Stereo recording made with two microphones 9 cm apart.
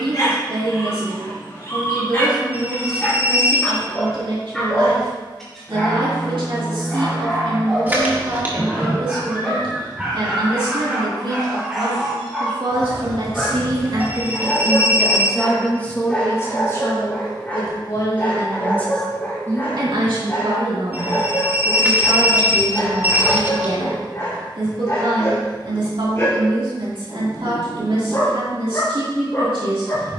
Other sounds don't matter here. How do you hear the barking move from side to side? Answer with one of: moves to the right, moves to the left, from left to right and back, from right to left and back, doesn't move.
from left to right and back.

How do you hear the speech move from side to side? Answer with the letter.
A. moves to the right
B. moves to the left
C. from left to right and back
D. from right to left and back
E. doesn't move
D.